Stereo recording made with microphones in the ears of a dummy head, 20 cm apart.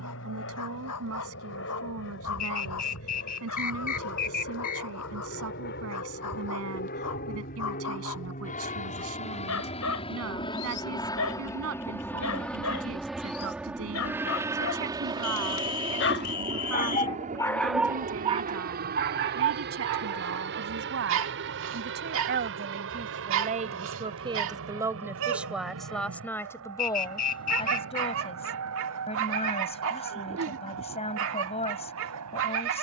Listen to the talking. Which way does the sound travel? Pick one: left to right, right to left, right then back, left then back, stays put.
right to left.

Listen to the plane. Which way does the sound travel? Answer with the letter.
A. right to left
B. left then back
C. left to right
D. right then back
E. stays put
C.